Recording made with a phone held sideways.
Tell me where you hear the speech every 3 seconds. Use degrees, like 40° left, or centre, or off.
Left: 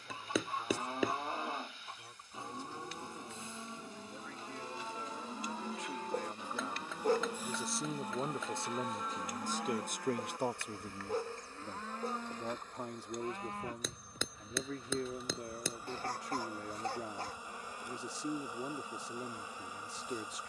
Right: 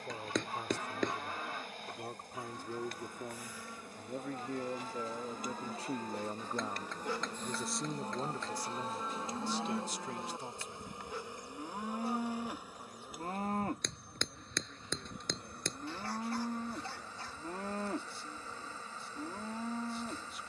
60° right, 40° right, centre, 60° left, 80° left, 80° left, 80° left.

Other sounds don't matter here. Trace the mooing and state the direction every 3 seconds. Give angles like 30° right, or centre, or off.
30° left, 20° left, 10° left, 20° right, 40° right, 60° right, 70° right.